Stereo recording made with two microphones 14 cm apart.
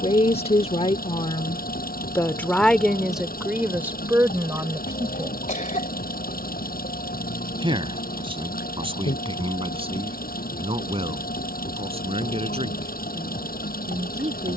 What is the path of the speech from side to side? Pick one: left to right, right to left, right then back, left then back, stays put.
left to right.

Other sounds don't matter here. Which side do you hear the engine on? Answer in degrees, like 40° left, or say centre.
80° left.